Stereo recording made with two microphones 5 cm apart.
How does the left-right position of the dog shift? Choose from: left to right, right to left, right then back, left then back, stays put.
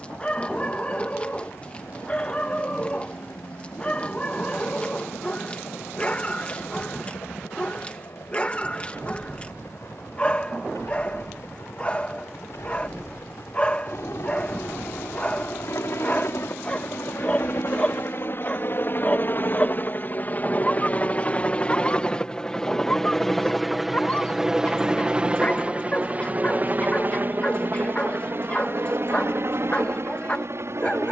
stays put.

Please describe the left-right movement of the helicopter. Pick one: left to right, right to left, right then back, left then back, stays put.
left to right.